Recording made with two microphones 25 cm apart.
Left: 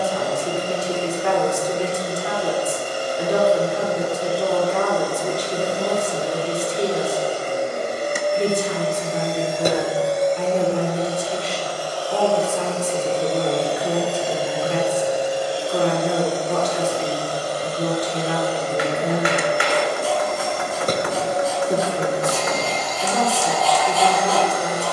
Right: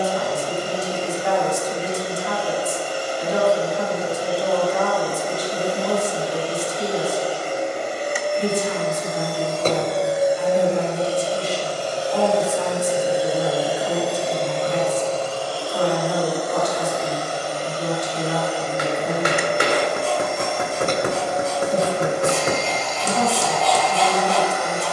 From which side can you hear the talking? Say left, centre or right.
left.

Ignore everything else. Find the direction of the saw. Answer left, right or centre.
centre.